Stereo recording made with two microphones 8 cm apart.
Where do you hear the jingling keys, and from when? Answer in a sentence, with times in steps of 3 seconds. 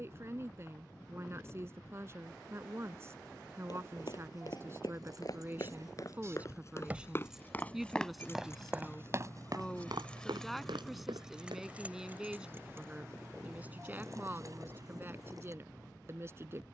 You can hear the jingling keys not at all from 0 s, on the right from 3 s, in the centre from 6 s and on the right from 12 s.